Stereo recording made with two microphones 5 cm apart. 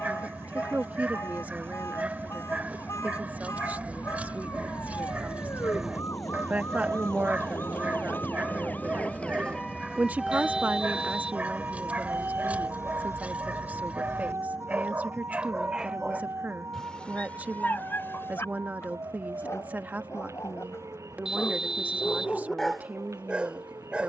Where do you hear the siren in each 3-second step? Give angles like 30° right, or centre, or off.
80° left, 70° left, 50° left, 10° right, 60° right, 70° right, 70° right, 80° right.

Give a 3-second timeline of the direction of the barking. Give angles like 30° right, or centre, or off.
30° right, 30° right, 30° right, 30° right, 30° right, 10° left, 60° left, 10° left.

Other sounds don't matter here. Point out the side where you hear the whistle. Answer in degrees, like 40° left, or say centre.
10° right.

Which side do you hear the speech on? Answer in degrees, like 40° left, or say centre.
30° right.